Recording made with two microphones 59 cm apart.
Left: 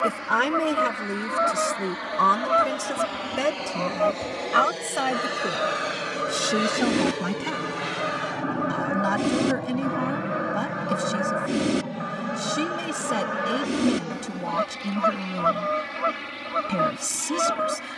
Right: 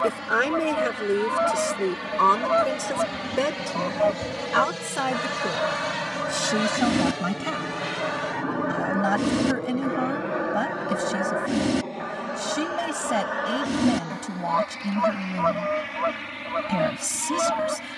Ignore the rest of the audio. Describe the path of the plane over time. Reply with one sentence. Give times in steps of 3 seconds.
In this clip you hear the plane on the right from 0 s, in the centre from 6 s and on the left from 9 s.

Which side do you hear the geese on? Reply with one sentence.
In this clip you hear the geese on the right.